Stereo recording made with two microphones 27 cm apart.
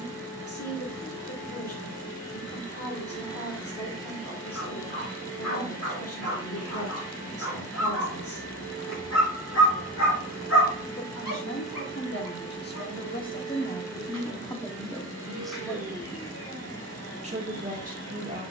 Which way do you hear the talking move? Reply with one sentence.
You can hear the talking move to the right.